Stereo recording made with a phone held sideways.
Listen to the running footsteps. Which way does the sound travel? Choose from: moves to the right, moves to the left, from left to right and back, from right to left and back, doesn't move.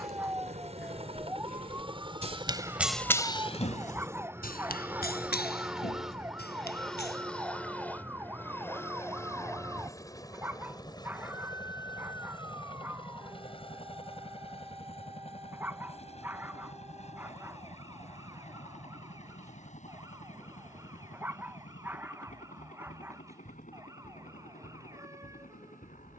moves to the left.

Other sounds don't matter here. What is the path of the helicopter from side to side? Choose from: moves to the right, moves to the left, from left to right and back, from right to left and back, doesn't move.
moves to the left.